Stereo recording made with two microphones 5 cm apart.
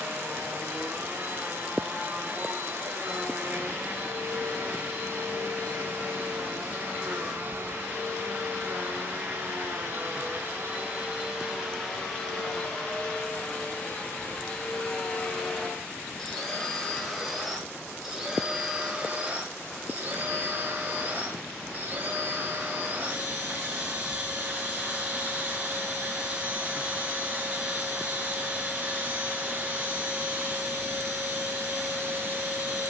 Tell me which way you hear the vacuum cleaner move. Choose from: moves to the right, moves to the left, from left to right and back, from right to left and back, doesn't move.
from right to left and back.